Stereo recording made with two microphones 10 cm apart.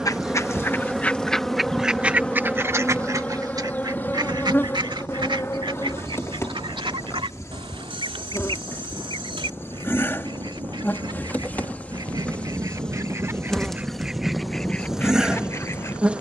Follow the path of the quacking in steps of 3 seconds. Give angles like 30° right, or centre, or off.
centre, 50° right, 60° right, 60° right, 20° right, 30° left.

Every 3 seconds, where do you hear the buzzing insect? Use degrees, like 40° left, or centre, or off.
centre, 20° left, 30° left, 20° left, 10° left, 10° right.